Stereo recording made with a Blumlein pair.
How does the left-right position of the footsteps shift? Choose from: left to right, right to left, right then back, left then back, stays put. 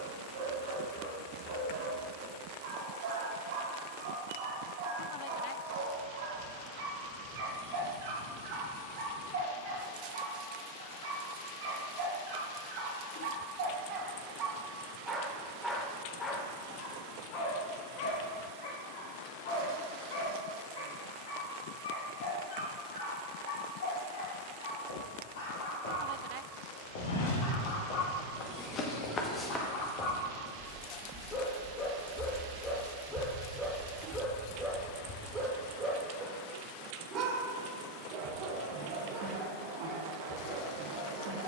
right then back.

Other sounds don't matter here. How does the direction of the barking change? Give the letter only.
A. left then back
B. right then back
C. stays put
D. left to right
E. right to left
A.